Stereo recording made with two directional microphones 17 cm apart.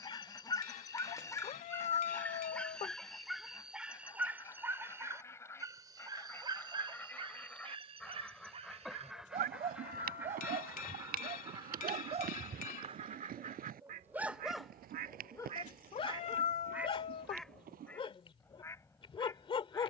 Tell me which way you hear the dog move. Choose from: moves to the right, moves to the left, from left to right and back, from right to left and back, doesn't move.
from left to right and back.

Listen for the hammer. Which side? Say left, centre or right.
left.